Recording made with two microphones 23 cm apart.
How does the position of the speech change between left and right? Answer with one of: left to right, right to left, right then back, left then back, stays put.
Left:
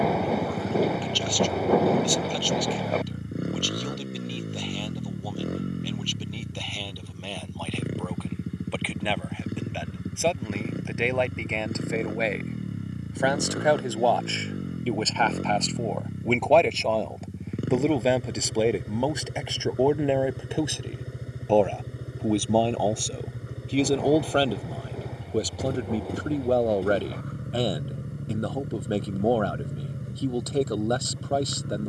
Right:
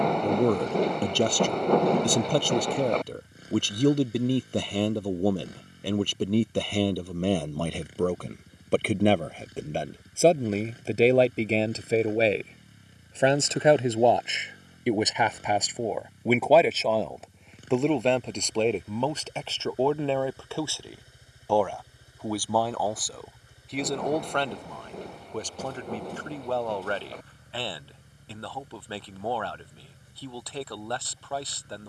right to left.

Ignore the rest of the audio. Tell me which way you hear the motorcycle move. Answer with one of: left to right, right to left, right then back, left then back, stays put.
stays put.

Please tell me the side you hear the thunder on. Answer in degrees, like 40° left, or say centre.
centre.